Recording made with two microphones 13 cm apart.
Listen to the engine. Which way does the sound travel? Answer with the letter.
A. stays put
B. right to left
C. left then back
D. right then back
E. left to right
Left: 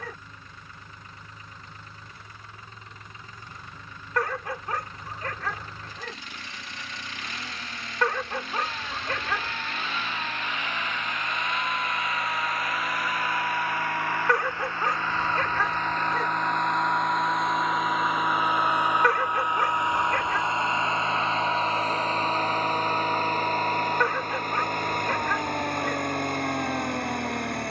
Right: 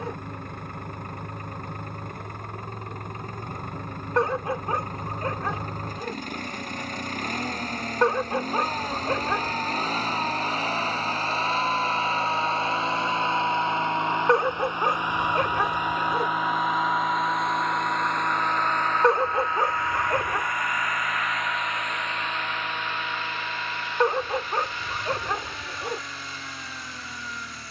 B.